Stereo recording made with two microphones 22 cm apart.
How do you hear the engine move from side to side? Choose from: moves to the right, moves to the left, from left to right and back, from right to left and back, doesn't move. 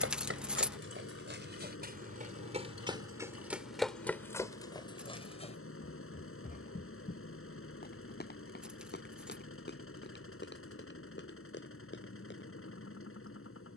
doesn't move.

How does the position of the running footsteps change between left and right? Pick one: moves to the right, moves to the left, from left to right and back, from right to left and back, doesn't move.
moves to the left.